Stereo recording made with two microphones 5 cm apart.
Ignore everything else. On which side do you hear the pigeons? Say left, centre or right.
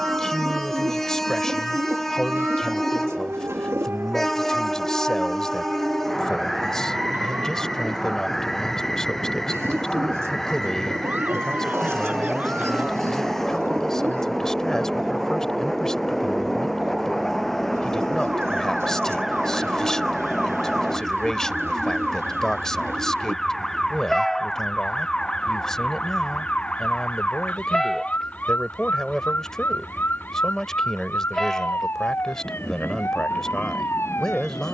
right.